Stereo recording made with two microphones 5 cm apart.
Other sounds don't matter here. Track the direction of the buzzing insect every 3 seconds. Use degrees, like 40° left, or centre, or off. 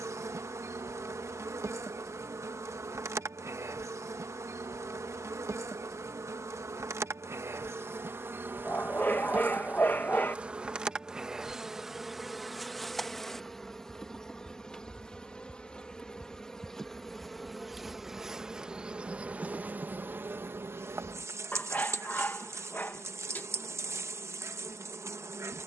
60° right, 60° right, 50° right, 20° right, centre, 10° left, 30° right, 60° right, 60° right.